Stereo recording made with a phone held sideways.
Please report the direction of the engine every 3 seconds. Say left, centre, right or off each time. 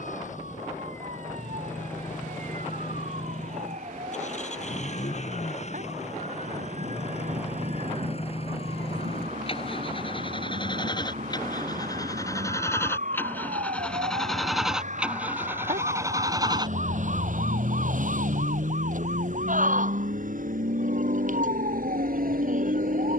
left, left, left, left, centre, right, right, right.